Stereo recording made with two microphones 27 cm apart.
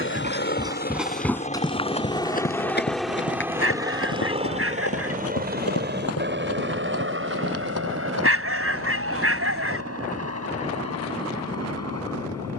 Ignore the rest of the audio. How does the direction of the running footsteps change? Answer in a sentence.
You can hear the running footsteps move from right to left.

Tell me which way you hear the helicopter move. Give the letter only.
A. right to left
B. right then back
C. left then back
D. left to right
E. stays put
D.